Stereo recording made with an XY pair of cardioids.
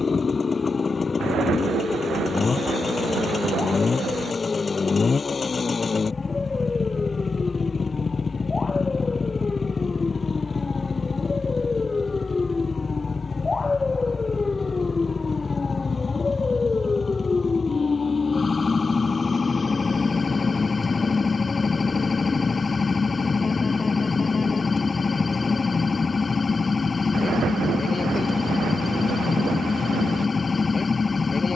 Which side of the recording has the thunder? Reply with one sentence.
You can hear the thunder on the right.